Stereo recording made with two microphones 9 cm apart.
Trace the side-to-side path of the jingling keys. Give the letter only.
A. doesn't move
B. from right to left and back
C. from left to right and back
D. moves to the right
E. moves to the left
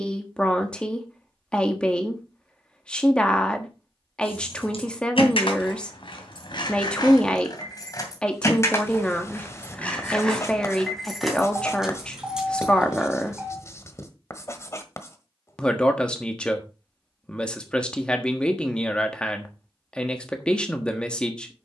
D.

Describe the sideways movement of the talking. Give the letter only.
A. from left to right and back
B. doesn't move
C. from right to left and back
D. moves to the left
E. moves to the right
B.